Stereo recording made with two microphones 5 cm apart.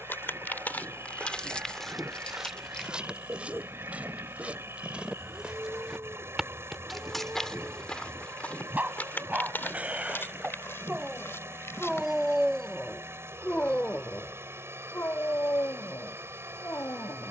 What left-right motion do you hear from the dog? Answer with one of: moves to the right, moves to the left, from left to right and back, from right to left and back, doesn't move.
moves to the left.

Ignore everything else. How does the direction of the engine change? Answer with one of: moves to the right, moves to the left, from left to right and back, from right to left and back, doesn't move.
doesn't move.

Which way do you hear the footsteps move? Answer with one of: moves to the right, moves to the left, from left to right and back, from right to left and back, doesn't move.
from left to right and back.